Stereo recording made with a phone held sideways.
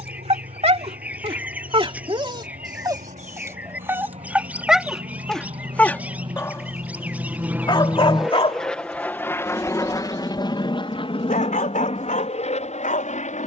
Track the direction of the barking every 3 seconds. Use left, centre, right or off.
right, centre, left, left, left.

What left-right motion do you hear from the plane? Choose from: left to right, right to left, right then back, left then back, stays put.
right to left.